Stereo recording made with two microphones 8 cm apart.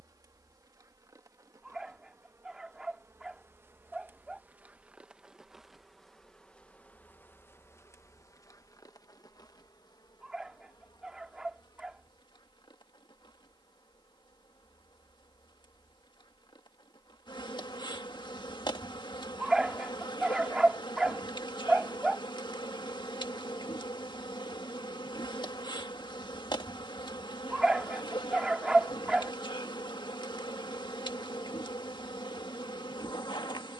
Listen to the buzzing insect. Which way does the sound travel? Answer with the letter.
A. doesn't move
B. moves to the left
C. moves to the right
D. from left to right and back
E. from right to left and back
B.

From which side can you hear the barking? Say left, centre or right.
centre.